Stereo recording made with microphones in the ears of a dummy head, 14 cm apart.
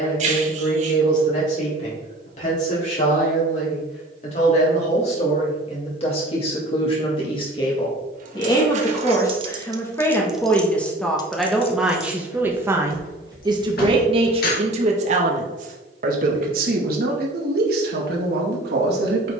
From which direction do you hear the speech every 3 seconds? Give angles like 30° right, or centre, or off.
50° left, 40° left, 30° left, 10° left, 30° right, 60° right, 70° right.